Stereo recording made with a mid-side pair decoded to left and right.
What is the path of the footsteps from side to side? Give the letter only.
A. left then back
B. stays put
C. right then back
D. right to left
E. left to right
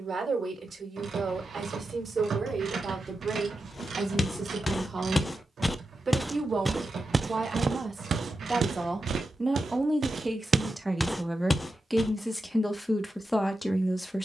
C.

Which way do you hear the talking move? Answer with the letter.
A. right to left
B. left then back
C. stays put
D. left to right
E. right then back
A.